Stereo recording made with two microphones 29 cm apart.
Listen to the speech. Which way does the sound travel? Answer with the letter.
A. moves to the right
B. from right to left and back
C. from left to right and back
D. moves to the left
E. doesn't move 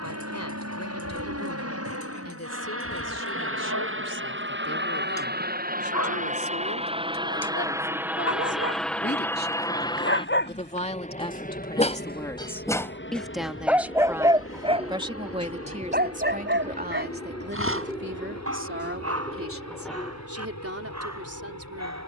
A.